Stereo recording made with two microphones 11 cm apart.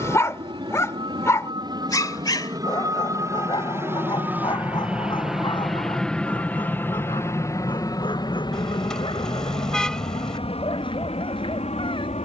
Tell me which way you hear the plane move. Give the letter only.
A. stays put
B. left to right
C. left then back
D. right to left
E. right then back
D.